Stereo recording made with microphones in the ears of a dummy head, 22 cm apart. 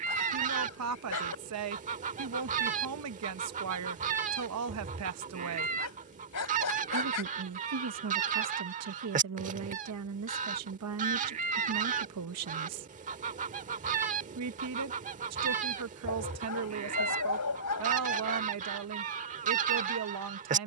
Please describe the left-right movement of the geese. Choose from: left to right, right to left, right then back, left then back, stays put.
stays put.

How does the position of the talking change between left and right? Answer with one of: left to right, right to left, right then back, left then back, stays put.
stays put.